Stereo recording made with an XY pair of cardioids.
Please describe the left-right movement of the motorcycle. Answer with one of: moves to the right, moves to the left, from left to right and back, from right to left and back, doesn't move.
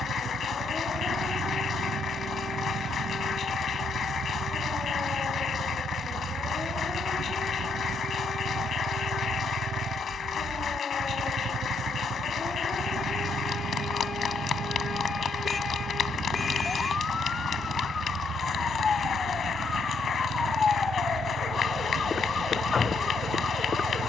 doesn't move.